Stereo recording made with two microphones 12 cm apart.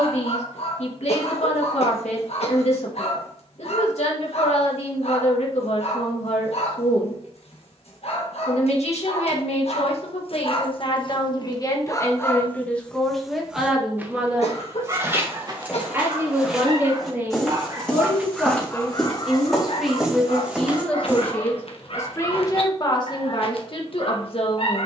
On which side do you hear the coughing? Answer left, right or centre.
left.